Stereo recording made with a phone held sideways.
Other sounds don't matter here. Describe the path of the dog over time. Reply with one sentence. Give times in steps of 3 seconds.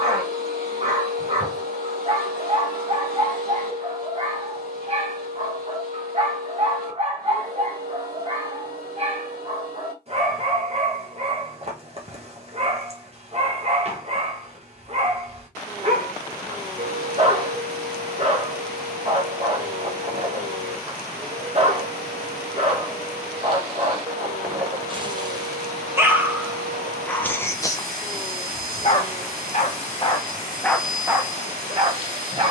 You can hear the dog on the right from 0 s, on the left from 27 s and in the centre from 30 s.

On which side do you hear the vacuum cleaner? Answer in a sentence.
You can hear the vacuum cleaner on the right.